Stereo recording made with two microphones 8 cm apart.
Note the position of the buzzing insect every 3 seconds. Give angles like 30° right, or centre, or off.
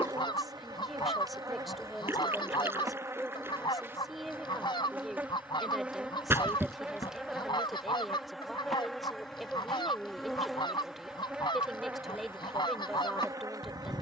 40° right, 20° right, 10° right, centre, 40° right.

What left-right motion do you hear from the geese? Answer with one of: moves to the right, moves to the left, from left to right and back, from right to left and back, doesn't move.
doesn't move.